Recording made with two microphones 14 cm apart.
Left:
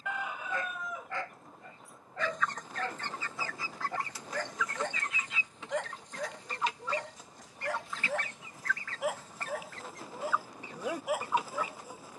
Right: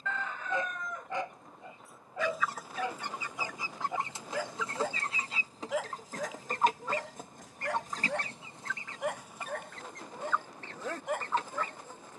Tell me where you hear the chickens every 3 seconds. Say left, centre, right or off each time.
centre, right, right, centre.